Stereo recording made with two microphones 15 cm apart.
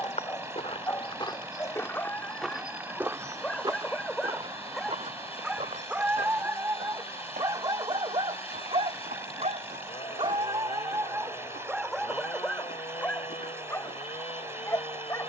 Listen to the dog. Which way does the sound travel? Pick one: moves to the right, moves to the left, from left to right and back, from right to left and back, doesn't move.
from left to right and back.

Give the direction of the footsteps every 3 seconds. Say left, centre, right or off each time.
left, right, right, right, right.